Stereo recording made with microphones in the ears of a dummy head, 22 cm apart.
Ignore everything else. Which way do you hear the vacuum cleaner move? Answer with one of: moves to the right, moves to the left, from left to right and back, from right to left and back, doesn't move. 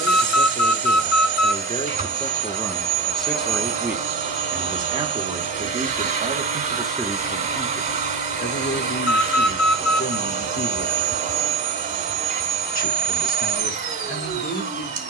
doesn't move.